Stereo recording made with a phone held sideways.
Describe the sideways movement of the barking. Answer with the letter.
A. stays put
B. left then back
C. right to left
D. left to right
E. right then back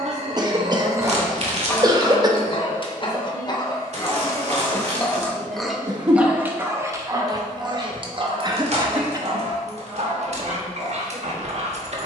B.